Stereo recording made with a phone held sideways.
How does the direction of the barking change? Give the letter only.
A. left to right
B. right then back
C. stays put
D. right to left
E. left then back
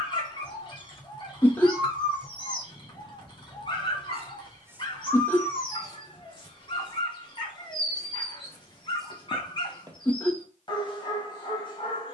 C.